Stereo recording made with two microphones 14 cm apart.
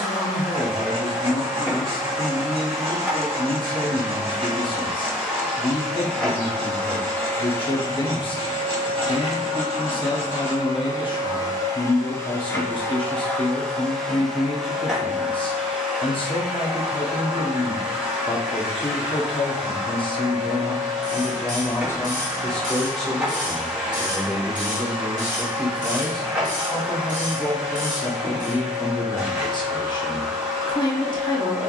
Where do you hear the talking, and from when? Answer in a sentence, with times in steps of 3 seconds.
In this clip you hear the talking on the left from 0 s, in the centre from 21 s and on the left from 27 s.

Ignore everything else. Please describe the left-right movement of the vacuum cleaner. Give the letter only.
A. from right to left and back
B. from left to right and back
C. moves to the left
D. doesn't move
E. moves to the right
A.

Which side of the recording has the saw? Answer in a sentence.
In this clip you hear the saw on the right.